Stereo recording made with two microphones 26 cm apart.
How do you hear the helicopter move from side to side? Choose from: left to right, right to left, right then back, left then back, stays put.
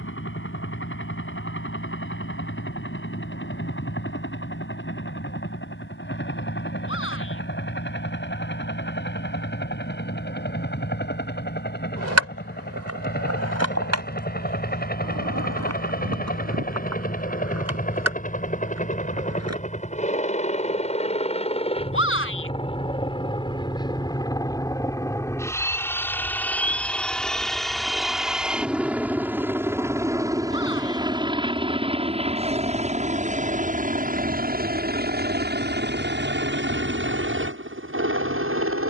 left to right.